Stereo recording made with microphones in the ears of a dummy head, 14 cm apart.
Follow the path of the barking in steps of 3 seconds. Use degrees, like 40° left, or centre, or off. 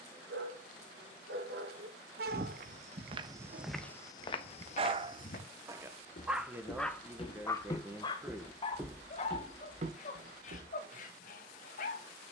70° right, 40° right, 20° left, 50° left.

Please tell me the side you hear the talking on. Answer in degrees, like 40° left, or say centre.
10° right.